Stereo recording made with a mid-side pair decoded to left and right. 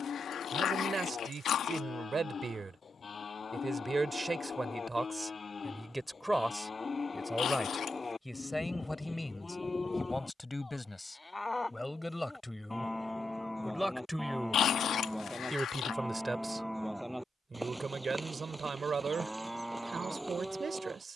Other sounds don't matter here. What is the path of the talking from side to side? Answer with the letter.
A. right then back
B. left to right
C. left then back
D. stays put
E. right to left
C.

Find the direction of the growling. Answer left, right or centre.
left.